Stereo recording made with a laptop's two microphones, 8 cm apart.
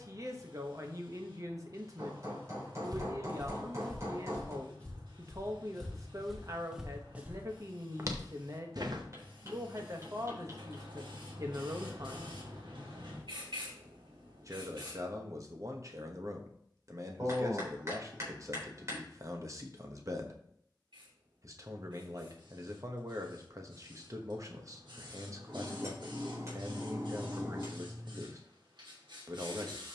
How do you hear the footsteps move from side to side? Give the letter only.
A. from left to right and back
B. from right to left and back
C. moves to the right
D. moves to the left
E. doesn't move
B.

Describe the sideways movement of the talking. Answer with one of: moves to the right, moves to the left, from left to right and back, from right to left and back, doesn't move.
doesn't move.